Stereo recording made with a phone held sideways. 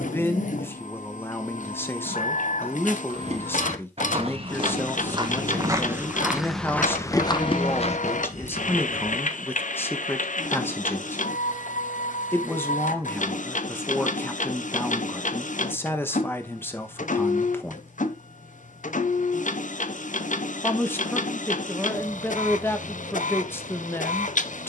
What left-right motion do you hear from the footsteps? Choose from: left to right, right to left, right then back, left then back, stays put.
right to left.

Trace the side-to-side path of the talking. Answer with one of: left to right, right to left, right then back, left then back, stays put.
stays put.